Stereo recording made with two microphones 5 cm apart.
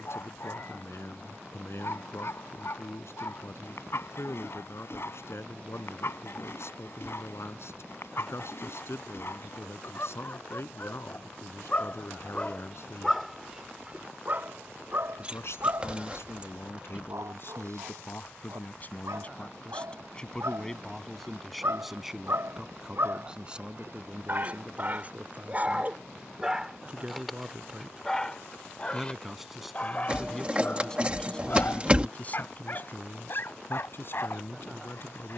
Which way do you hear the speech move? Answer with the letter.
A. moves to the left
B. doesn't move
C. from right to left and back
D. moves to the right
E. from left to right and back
E.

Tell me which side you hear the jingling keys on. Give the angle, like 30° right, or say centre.
20° right.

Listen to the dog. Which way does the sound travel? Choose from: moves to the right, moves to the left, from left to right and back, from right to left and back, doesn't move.
from left to right and back.